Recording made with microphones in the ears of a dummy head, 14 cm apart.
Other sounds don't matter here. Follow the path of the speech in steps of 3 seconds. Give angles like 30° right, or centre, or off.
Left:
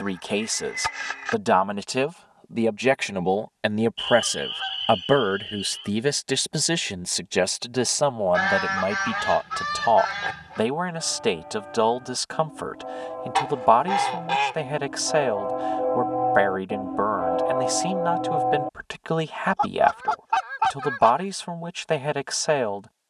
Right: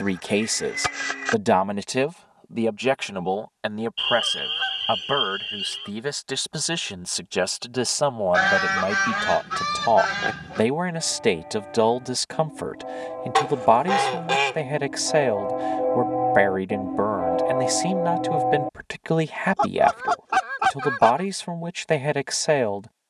10° right, 30° left, 10° left, 20° right, 20° right, 20° right, 20° right, 20° right.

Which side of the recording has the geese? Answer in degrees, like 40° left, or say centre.
60° right.